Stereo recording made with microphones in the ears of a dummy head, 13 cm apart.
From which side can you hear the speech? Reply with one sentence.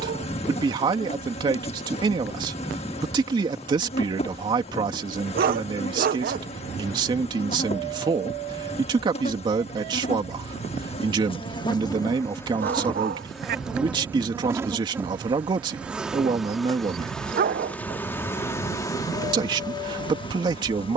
In this clip you hear the speech on the right.